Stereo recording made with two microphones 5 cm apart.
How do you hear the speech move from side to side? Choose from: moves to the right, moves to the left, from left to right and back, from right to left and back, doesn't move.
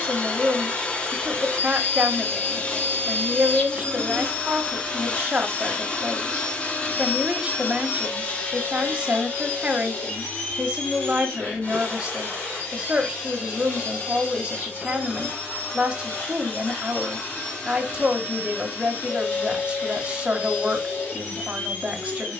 doesn't move.